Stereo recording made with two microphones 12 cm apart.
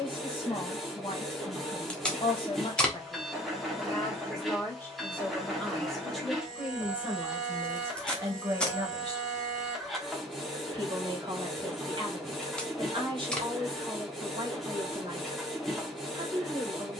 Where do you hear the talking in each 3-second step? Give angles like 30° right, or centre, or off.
40° left, 20° left, 20° right, 40° right, 40° right, 40° right.